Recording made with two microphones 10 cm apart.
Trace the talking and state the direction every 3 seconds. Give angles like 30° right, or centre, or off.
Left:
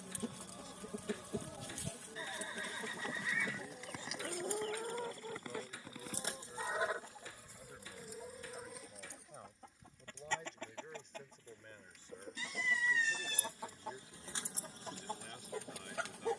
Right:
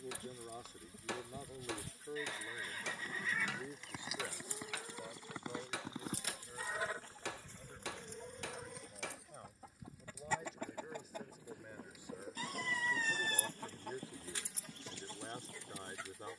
40° right, 10° right, centre, centre, 20° right, 30° right.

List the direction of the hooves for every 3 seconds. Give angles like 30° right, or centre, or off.
30° left, 10° right, 40° right, 50° right, 50° right, 60° right.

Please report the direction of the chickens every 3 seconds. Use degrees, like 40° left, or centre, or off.
70° left, 60° left, 10° left, 10° right, 10° left, 60° left.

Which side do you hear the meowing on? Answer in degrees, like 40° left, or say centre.
40° right.